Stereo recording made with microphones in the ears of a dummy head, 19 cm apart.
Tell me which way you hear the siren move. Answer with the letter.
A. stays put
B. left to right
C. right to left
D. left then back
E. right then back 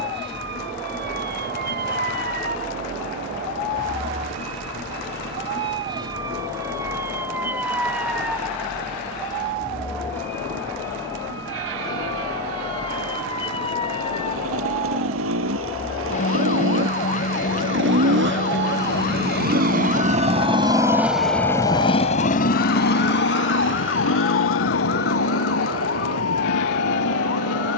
C.